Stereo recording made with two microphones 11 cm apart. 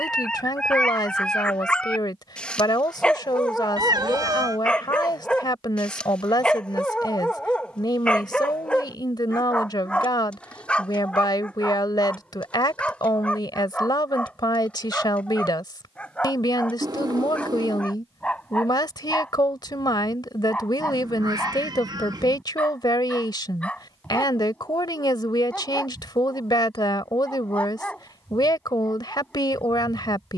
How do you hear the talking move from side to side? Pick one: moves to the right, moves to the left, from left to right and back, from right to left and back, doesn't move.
doesn't move.